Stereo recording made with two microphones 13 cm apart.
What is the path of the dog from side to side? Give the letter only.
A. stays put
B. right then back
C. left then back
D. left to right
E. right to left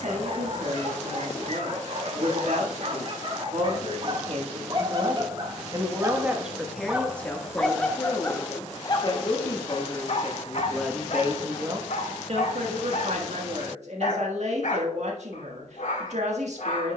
E.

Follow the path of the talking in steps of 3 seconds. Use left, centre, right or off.
right, right, centre, centre, right, right.